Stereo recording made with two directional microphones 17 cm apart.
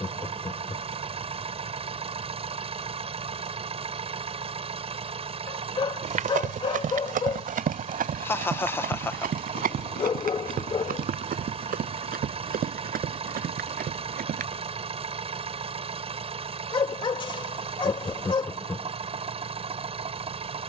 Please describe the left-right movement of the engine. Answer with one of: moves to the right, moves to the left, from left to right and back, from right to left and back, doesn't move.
doesn't move.